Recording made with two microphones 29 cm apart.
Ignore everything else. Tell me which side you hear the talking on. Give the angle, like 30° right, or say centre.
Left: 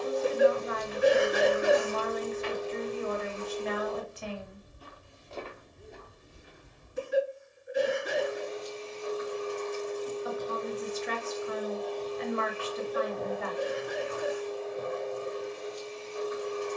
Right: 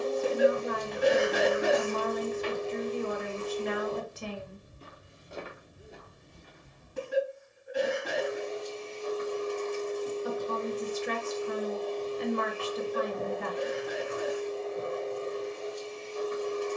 50° right.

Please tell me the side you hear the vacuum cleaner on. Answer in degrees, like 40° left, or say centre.
30° right.